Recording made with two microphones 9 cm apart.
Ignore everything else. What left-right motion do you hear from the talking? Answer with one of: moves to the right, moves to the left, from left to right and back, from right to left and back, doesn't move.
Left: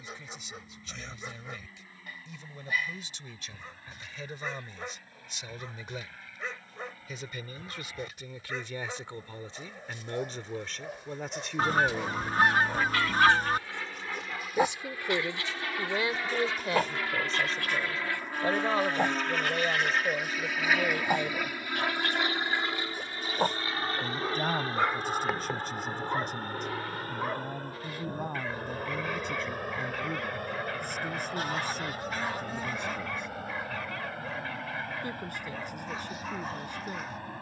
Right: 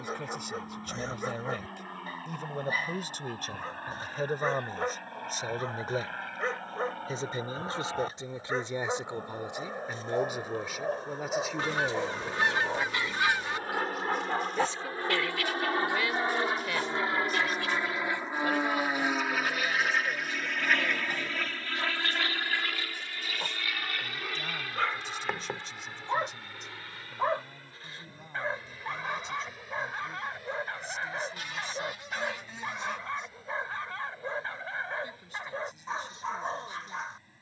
moves to the left.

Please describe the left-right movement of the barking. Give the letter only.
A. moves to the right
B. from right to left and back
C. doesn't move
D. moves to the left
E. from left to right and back
B.